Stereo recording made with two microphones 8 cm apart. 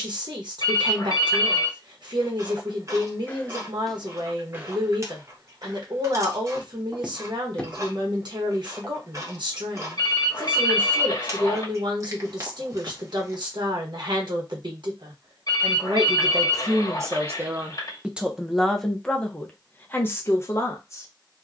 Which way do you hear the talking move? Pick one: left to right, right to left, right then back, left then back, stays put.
right to left.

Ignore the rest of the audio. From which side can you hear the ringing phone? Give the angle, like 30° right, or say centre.
50° left.